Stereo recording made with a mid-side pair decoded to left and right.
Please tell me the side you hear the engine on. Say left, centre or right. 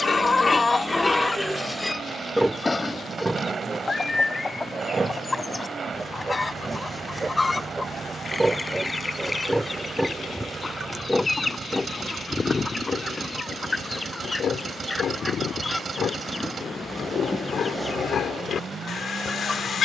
right.